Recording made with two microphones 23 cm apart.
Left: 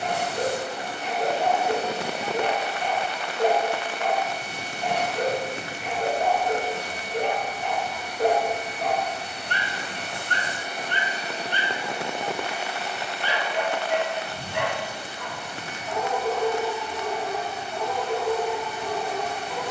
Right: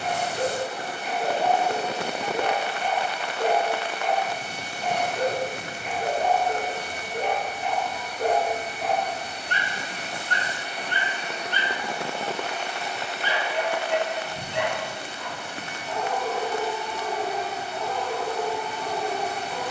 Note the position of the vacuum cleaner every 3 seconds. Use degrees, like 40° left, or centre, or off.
70° left, 70° left, 70° left, 50° left, 10° right, 30° right, 40° right.